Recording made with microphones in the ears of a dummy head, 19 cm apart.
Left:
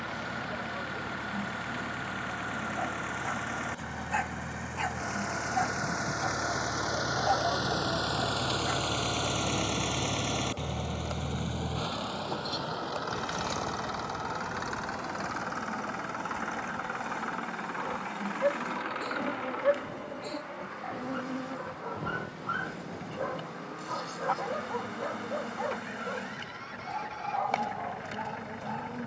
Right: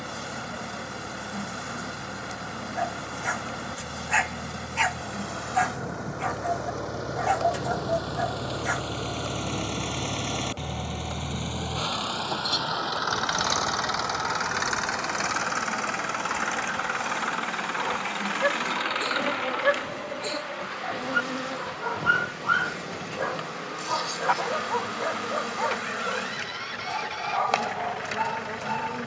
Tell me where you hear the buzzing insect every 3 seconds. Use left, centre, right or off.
right, right, right, centre, centre, right, right, right, right, right.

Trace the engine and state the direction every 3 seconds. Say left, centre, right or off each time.
left, left, left, centre, right, right, right, right, right, right.